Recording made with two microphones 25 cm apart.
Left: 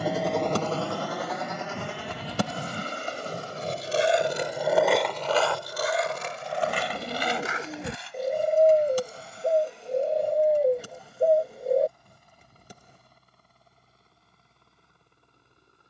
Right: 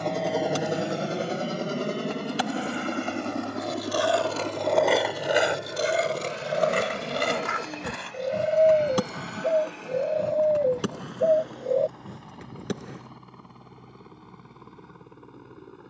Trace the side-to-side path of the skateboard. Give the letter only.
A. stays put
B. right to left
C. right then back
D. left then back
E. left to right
E.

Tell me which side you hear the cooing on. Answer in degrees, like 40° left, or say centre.
centre.